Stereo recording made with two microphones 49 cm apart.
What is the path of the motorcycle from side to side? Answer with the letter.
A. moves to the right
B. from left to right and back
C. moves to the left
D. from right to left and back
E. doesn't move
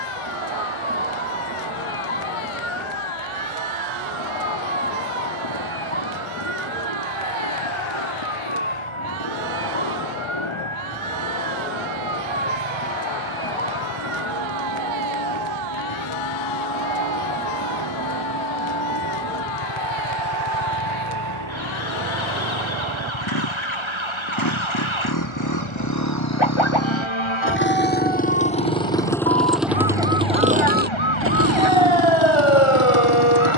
A.